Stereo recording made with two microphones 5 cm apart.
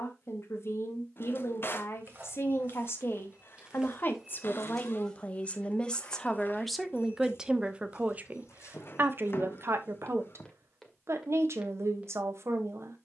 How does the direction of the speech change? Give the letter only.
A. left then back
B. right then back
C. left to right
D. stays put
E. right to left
C.